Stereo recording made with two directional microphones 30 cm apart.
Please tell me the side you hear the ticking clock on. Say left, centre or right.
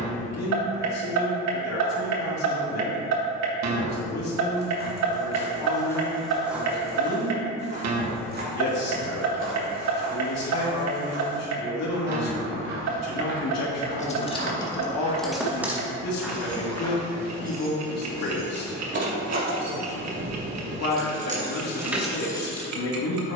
right.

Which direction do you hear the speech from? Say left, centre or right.
left.